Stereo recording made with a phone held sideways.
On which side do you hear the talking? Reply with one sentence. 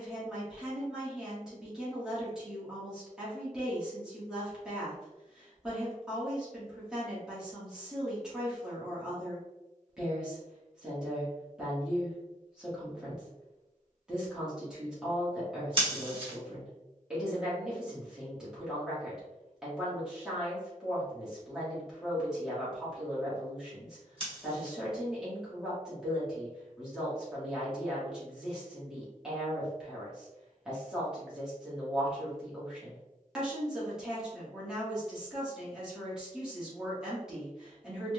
You can hear the talking in the centre.